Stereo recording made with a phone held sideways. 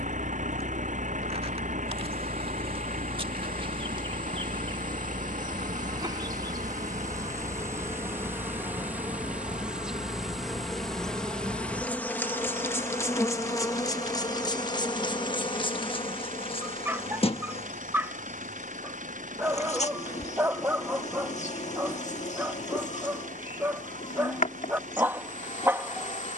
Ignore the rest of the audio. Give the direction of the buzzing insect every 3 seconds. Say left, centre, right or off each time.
right, right, right, centre, left, left, left, left, left.